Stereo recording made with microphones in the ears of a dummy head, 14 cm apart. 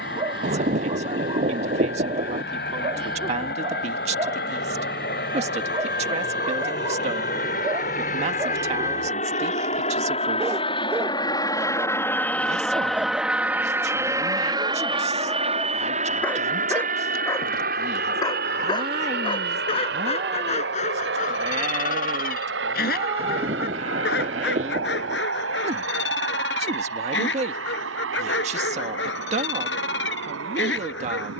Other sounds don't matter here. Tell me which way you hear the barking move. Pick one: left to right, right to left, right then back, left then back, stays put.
right to left.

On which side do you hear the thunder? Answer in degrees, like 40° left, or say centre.
50° right.